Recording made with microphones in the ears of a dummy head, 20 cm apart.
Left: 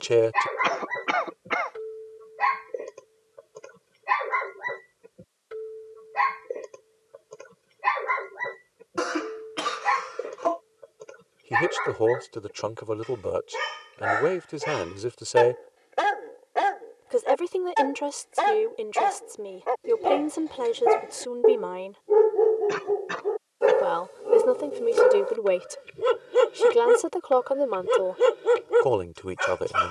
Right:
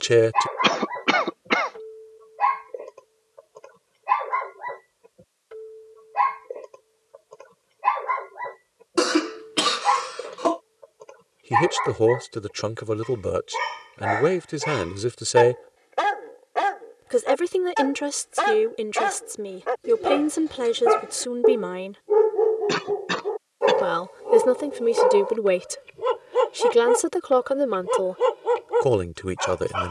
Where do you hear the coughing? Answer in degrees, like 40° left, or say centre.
50° right.